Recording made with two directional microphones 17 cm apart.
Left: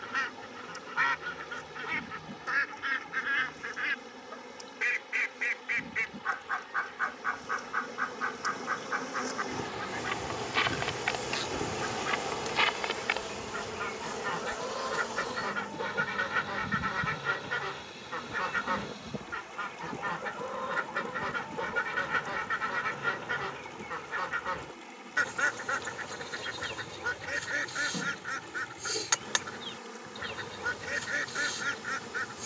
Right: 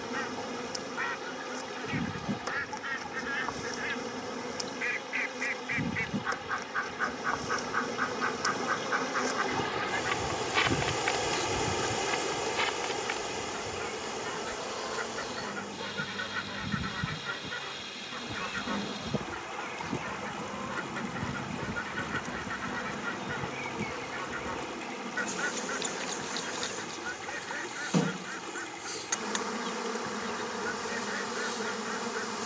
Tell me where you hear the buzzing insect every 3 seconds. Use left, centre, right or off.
right, right, right, centre, centre, centre, right, right, right, right, right.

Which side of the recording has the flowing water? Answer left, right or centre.
right.